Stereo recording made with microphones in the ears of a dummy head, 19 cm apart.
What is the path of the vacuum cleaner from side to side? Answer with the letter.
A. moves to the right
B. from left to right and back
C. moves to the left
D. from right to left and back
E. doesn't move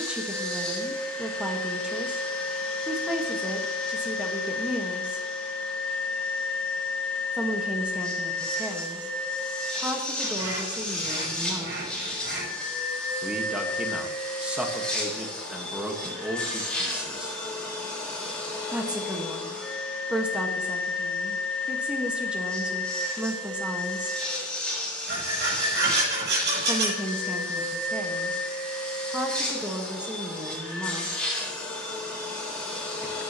E.